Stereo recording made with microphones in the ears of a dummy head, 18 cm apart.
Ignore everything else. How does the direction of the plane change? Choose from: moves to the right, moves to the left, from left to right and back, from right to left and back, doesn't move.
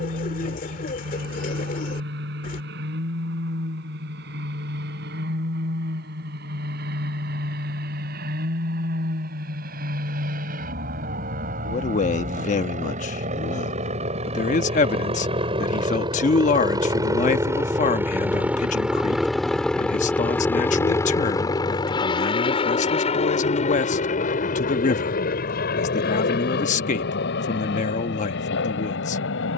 moves to the left.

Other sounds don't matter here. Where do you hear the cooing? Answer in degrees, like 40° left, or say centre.
40° left.